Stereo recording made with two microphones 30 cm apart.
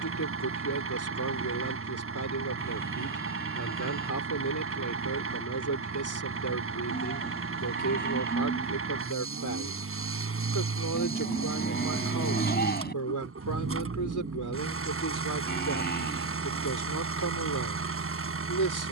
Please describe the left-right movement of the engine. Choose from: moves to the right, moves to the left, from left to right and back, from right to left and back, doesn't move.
doesn't move.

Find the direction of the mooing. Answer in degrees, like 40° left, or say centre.
30° left.